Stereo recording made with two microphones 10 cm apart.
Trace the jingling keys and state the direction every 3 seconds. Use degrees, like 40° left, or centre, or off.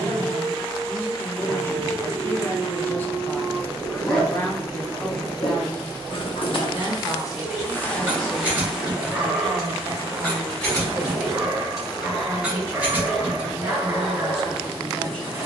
off, off, 10° right, centre, 20° right.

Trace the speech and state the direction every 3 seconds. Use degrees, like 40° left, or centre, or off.
20° left, 10° left, 30° right, 40° right, 20° right.